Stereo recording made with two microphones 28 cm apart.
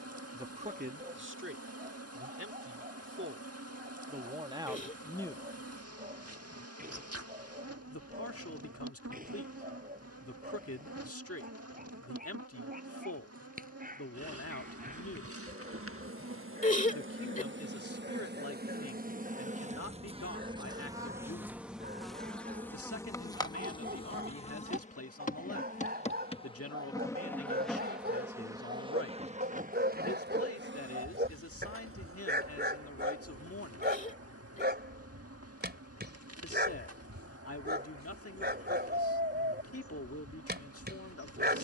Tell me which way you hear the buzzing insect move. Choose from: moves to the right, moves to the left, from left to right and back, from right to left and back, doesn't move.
from right to left and back.